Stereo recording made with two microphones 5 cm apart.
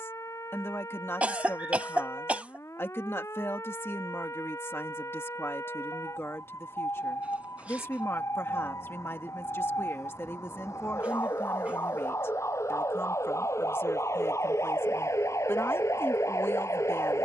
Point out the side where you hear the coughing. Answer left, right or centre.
right.